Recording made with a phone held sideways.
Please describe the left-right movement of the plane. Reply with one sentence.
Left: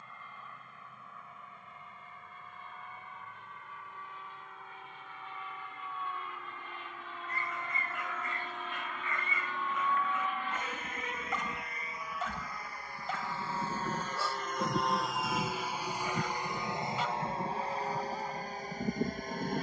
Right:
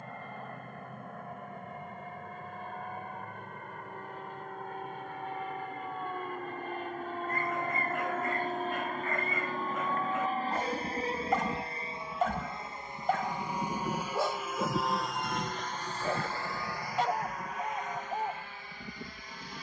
In this clip you hear the plane move to the left.